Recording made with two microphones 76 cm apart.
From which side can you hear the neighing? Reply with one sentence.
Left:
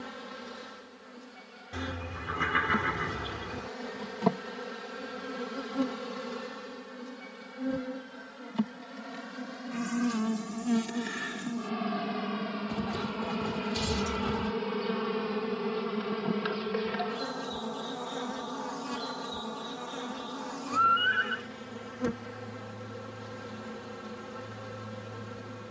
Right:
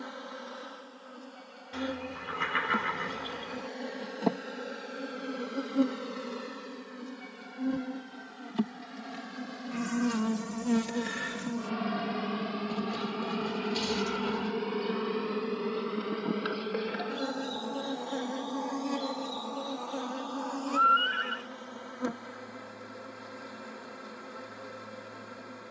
You can hear the neighing on the left.